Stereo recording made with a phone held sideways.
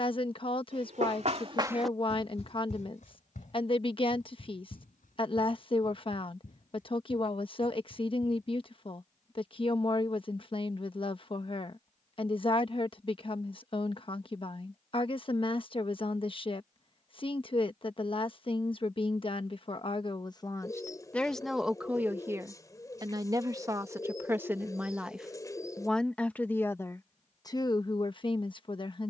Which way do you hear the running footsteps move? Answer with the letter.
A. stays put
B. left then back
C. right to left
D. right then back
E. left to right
C.